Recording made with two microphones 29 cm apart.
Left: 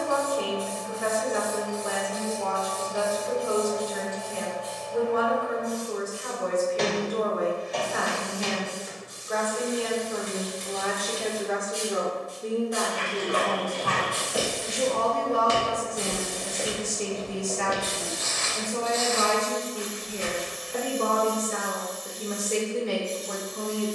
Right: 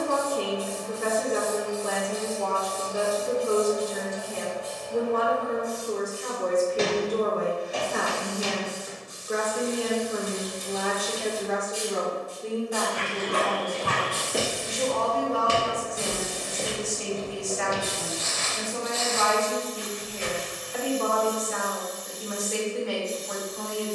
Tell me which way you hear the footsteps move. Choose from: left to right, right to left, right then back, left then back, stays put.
right to left.